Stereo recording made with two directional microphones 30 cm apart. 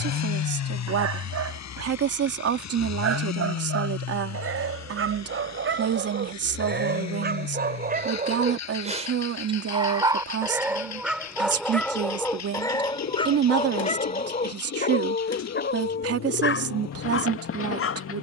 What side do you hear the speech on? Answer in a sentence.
You can hear the speech on the right.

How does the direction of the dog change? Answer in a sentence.
You can hear the dog move to the left.